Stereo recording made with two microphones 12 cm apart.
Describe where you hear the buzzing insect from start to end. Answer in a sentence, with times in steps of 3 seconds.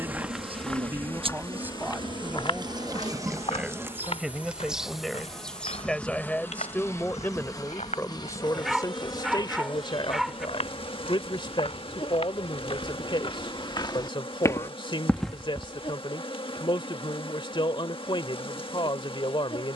In this clip you hear the buzzing insect on the right from 0 s, in the centre from 3 s and on the left from 6 s.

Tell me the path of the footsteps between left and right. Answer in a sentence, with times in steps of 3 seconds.
You can hear the footsteps on the left from 0 s, in the centre from 15 s and not at all from 18 s.